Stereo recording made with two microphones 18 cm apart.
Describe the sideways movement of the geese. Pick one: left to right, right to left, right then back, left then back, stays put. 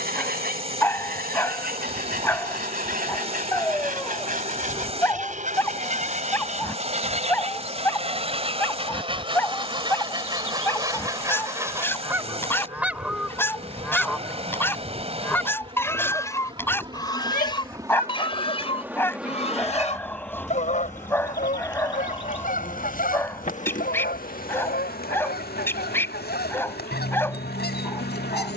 right to left.